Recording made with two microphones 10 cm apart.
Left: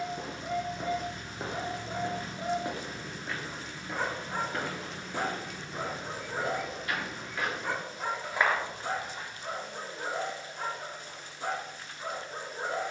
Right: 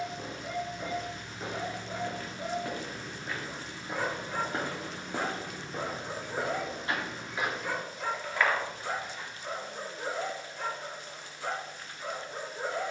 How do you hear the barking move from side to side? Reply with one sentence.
You can hear the barking stay put.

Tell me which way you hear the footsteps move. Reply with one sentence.
In this clip you hear the footsteps go right and come back.